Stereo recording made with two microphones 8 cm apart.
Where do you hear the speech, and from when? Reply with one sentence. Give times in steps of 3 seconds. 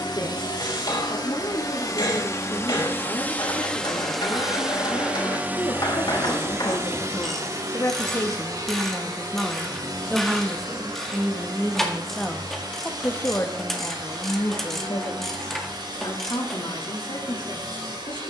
You can hear the speech on the left from 0 s, in the centre from 9 s and on the left from 12 s.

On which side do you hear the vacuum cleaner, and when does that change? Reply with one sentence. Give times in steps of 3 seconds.
You can hear the vacuum cleaner on the left from 0 s, in the centre from 3 s and on the right from 6 s.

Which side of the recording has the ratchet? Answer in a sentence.
You can hear the ratchet in the centre.